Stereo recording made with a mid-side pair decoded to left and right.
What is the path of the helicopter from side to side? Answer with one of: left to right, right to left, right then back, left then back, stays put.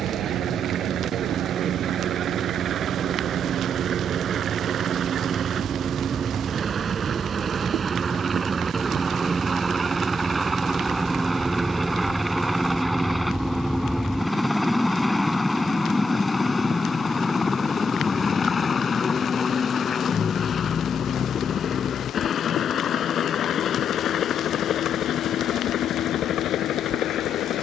right to left.